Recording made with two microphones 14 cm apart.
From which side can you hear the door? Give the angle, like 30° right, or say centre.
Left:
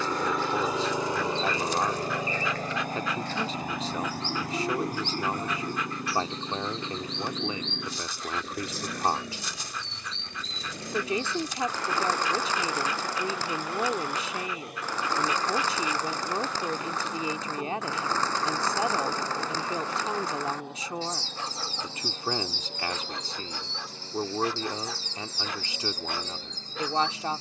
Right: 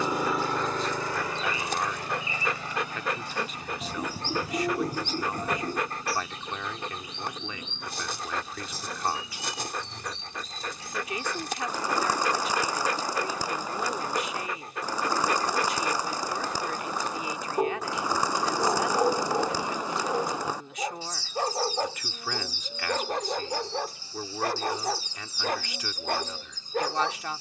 20° right.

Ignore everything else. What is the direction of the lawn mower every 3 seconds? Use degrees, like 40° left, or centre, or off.
30° left, 60° left, 70° left, 80° left, 80° left, 80° left, 80° left, 80° left, 80° left.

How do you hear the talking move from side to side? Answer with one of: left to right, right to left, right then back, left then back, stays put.
stays put.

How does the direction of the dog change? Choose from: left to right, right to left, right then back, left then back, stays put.
stays put.